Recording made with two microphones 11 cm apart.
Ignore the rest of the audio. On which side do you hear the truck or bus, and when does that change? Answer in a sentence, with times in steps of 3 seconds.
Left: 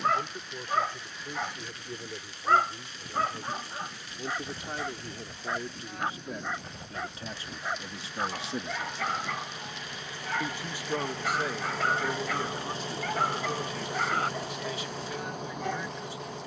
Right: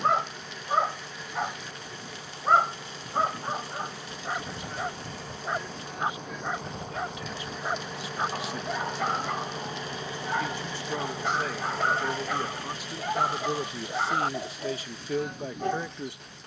You can hear the truck or bus on the right from 0 s and on the left from 12 s.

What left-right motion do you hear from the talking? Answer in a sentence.
In this clip you hear the talking move from left to right.